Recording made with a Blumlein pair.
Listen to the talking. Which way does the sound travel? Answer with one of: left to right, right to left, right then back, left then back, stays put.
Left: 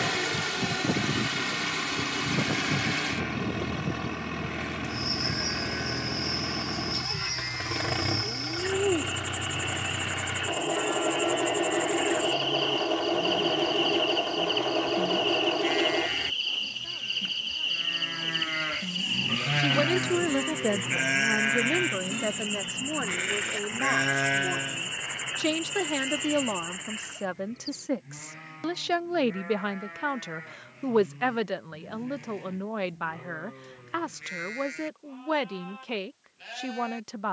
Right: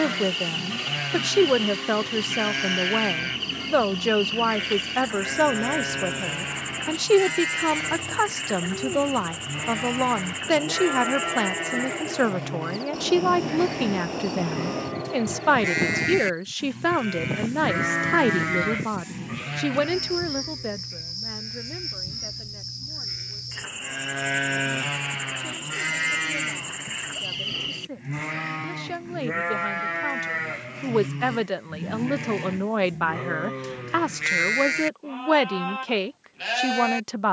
left then back.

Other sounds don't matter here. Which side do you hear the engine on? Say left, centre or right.
left.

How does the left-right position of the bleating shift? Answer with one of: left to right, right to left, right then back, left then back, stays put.
left then back.